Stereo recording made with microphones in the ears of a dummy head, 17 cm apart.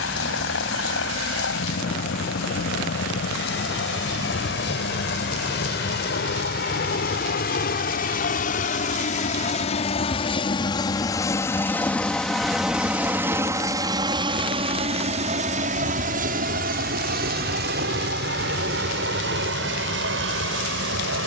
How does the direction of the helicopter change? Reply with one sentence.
You can hear the helicopter move to the right.